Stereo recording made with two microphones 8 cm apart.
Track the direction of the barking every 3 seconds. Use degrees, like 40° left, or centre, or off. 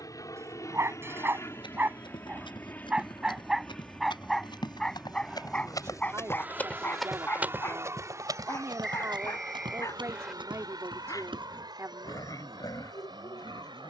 20° right, centre, 30° left, 40° left, 50° left.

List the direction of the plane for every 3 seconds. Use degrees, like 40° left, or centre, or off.
30° left, centre, 30° right, 40° right, 50° right.